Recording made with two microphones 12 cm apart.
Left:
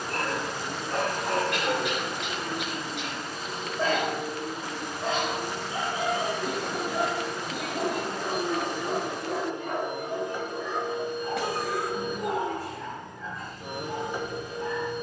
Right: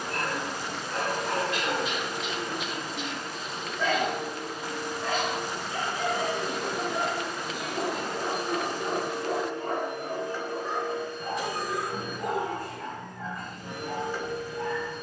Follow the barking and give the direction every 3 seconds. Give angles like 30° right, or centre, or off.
50° left, 30° left, 10° right, 40° right, 60° right.